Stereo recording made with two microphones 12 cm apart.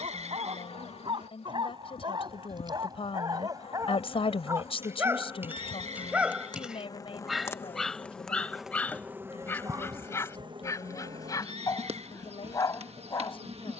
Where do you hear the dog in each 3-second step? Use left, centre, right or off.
right, right, centre, left, left.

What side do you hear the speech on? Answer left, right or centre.
left.